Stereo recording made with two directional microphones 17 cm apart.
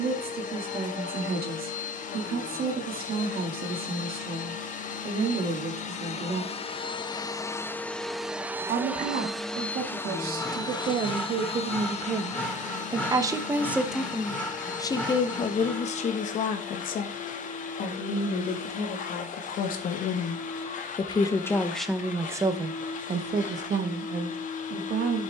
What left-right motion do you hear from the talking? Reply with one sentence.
In this clip you hear the talking move from right to left and back again.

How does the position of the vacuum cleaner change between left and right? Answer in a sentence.
In this clip you hear the vacuum cleaner move from left to right and back again.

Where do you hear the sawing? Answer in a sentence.
You can hear the sawing in the centre.